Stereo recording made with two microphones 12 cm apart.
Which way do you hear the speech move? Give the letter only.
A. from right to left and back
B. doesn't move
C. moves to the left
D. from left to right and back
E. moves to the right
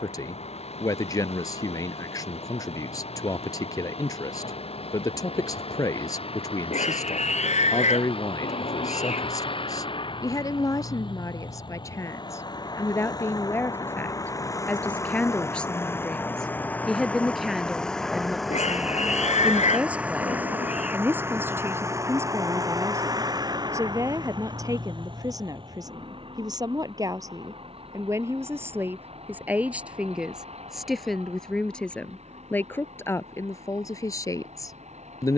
D.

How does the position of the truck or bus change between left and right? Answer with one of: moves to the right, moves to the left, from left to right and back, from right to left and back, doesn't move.
moves to the right.